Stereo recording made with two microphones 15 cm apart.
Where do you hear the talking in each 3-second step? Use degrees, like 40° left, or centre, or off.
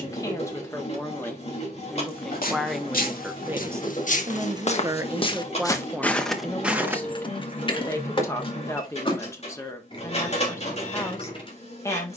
10° left, 20° right, 10° left, 20° left.